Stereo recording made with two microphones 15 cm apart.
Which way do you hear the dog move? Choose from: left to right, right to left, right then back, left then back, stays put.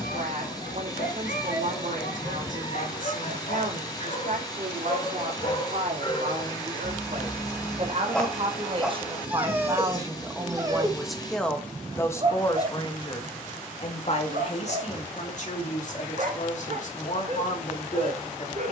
left to right.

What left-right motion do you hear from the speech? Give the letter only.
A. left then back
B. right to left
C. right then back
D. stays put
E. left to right
B.